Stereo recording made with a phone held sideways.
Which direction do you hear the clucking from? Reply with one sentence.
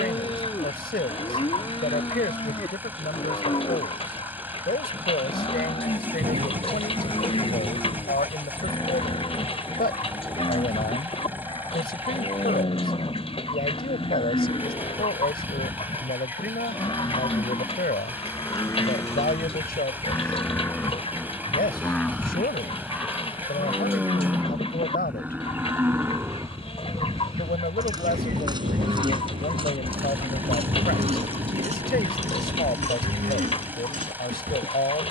You can hear the clucking on the left.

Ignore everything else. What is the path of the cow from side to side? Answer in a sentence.
In this clip you hear the cow move to the right.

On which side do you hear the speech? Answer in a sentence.
You can hear the speech on the left.